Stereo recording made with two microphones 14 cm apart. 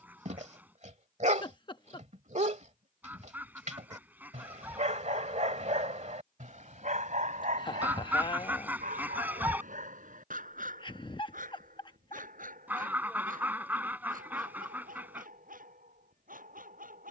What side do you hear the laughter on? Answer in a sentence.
You can hear the laughter on the left.